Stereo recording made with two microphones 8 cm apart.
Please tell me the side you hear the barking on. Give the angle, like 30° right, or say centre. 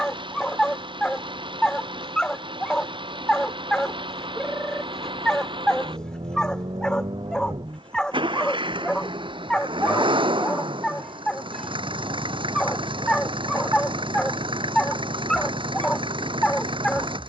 10° left.